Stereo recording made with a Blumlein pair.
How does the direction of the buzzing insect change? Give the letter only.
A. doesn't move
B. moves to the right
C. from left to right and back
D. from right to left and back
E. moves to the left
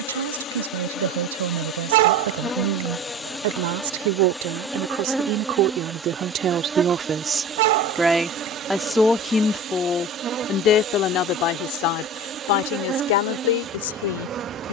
B.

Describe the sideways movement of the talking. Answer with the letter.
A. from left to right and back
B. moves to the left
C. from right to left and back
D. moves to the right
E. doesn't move
B.